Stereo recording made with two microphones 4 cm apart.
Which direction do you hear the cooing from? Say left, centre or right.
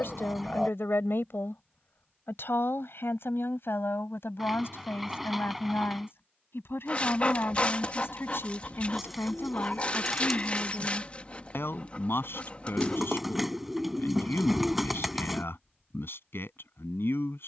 centre.